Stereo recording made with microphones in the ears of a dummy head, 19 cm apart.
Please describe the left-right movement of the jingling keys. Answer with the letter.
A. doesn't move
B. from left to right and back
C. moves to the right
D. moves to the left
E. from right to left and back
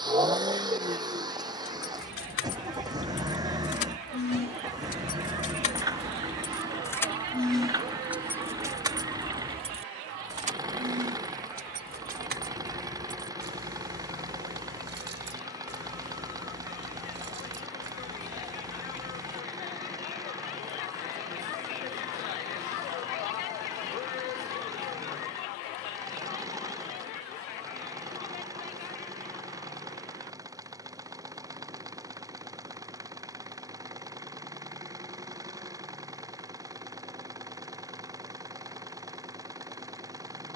C.